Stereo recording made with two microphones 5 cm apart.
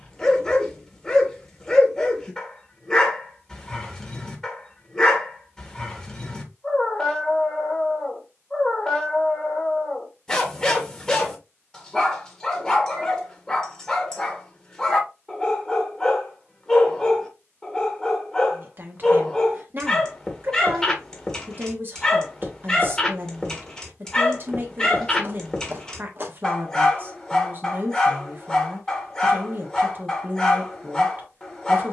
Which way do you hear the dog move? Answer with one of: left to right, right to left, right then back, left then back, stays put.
stays put.